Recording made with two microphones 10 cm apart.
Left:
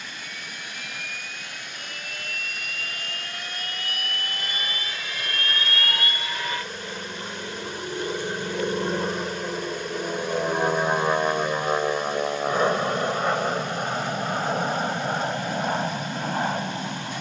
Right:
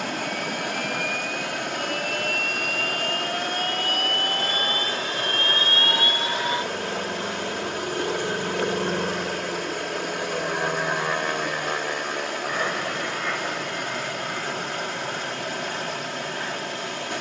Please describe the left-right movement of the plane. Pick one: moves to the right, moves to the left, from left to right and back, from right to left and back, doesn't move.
moves to the left.